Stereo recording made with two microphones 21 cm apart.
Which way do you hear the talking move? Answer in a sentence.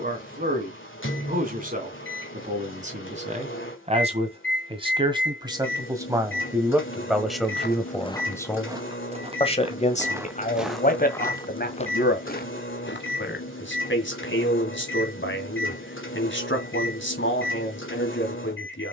You can hear the talking move to the left.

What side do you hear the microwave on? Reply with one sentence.
In this clip you hear the microwave on the left.